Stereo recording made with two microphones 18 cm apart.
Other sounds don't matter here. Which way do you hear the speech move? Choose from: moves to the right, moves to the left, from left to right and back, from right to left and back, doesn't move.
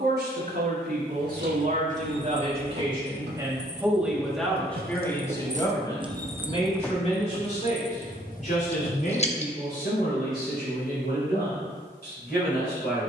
moves to the left.